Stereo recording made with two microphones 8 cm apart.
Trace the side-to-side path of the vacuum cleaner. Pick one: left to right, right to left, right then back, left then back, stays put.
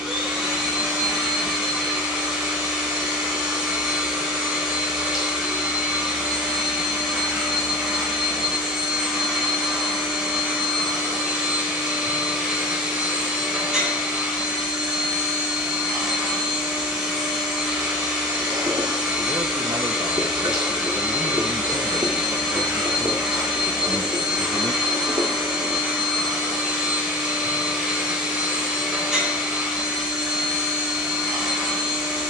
stays put.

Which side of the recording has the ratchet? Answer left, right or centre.
right.